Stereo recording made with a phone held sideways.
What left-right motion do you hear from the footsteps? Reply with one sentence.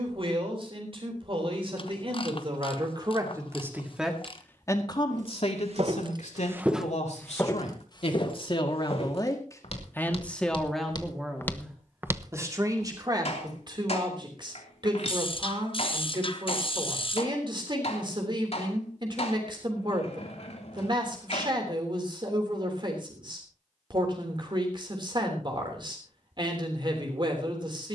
You can hear the footsteps move from right to left and back again.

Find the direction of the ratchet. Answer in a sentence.
In this clip you hear the ratchet on the left.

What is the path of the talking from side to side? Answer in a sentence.
In this clip you hear the talking move from right to left and back again.